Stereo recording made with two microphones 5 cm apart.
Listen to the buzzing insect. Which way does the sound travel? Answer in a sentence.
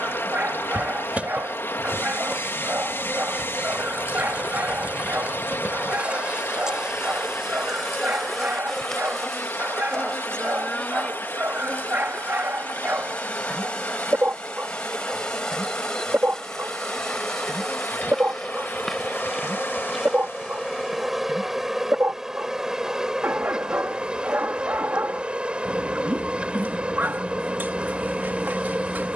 In this clip you hear the buzzing insect go left and come back.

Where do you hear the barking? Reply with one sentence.
You can hear the barking on the right.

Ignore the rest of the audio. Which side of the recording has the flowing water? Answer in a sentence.
You can hear the flowing water on the left.